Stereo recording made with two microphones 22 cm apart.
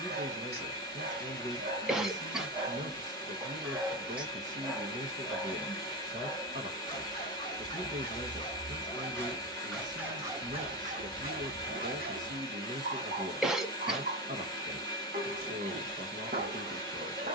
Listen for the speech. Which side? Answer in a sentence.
You can hear the speech on the right.